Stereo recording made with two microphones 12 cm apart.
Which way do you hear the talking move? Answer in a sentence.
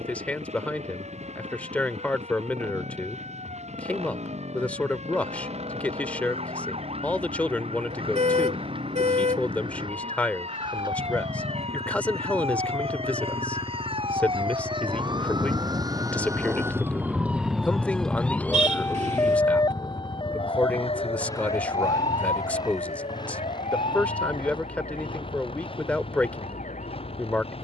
You can hear the talking stay in one place.